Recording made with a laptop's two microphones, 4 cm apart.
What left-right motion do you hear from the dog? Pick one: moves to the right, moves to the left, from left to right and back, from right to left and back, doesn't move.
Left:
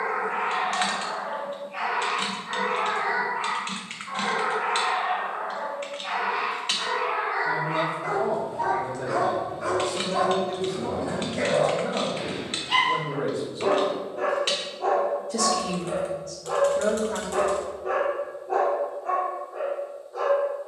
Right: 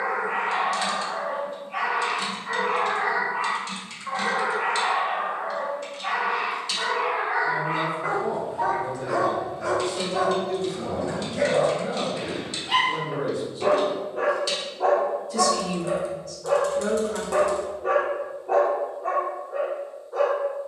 from right to left and back.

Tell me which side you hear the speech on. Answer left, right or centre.
left.